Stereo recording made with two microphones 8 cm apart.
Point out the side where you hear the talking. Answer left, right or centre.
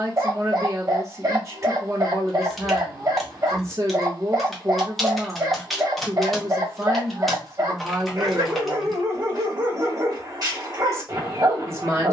right.